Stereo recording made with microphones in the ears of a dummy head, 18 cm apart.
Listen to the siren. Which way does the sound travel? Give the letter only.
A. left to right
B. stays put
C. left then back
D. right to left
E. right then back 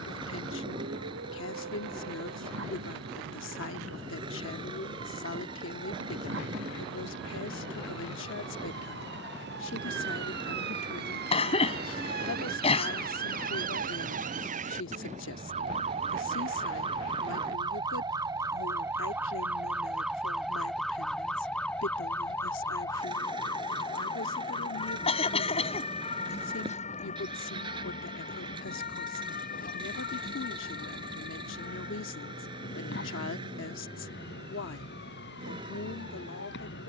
D.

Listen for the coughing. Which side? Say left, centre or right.
left.